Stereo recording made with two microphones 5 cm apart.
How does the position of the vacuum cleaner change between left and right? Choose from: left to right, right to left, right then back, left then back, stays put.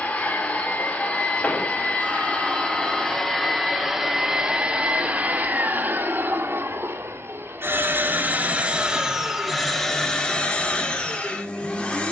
right then back.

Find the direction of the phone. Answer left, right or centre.
right.